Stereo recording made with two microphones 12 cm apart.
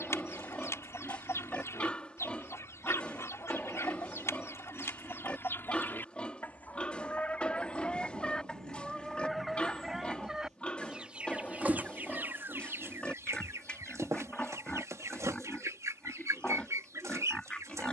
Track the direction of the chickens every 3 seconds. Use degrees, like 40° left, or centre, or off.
20° left, 20° left, 10° left, 10° right, 20° right, 30° right.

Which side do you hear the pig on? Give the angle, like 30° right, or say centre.
10° left.